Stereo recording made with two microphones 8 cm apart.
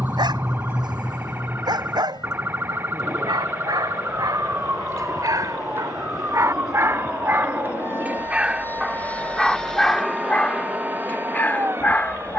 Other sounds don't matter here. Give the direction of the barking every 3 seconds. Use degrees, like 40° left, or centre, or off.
70° right, 60° right, 30° right, 20° left.